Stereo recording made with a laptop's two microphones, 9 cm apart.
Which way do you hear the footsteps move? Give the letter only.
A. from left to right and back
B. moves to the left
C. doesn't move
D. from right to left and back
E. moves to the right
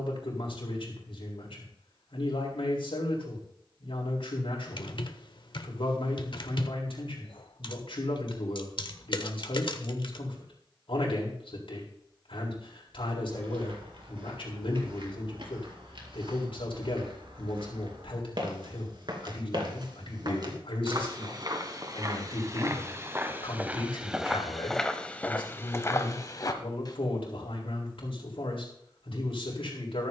B.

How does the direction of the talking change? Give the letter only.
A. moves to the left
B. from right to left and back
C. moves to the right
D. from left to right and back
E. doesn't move
E.